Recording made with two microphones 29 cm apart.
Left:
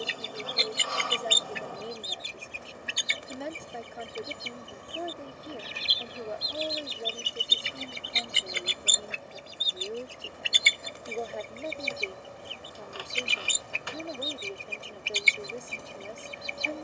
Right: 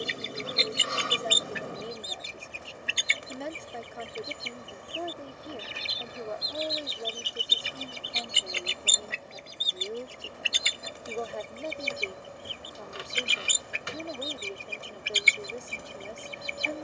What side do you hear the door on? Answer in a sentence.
You can hear the door on the right.